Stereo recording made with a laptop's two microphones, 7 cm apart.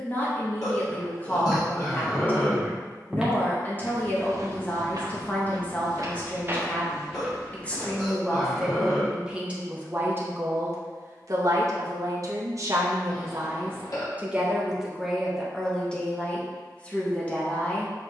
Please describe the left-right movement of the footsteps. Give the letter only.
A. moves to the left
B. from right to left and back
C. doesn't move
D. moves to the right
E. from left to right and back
E.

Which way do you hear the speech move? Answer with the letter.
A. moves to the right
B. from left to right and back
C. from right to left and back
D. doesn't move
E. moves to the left
B.